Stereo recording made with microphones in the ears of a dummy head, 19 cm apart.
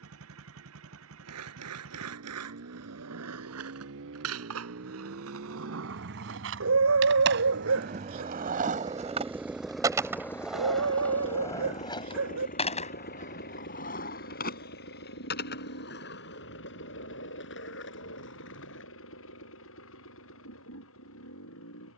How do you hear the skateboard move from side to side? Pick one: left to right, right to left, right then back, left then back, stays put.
right to left.